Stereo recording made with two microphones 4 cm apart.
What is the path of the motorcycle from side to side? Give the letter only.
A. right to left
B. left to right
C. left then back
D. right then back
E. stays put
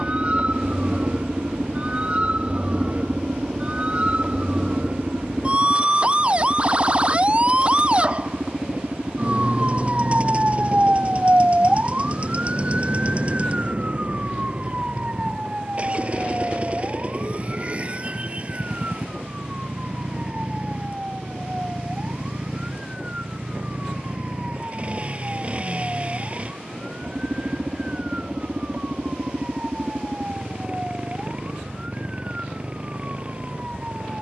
E.